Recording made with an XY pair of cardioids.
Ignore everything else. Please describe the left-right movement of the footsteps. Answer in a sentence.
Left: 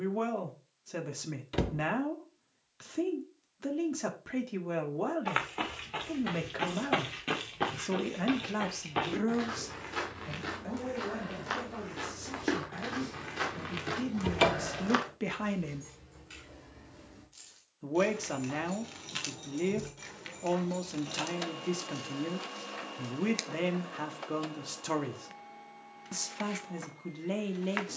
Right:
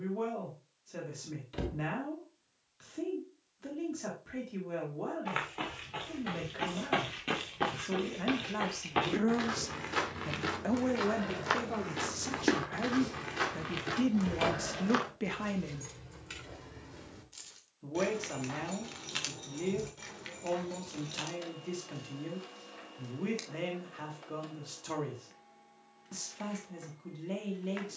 In this clip you hear the footsteps go right and come back.